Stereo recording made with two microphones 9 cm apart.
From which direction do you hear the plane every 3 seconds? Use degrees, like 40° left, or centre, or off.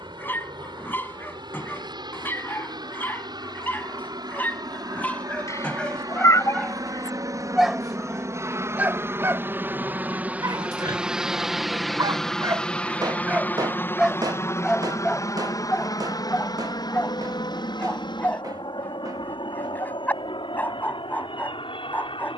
60° right, 50° right, 40° right, 10° right, 20° left, 50° left, 60° left, 70° left.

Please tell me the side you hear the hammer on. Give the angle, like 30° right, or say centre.
50° right.